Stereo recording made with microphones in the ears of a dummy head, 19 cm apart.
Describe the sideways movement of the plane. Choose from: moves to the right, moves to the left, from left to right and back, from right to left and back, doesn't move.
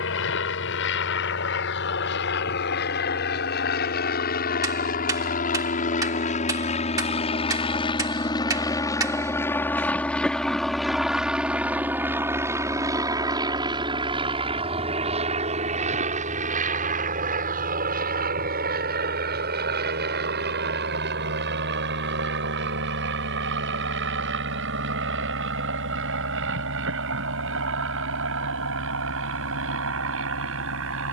moves to the right.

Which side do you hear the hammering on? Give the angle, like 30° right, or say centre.
20° right.